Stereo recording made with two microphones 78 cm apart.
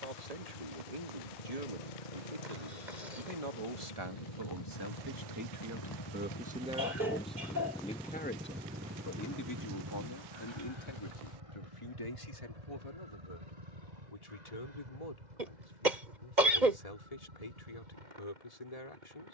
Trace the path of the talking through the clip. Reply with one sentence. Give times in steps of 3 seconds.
In this clip you hear the talking on the right from 0 s, in the centre from 6 s and on the left from 9 s.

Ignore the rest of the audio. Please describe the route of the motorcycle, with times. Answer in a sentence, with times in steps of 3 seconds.
You can hear the motorcycle on the left from 0 s, in the centre from 6 s and on the right from 9 s.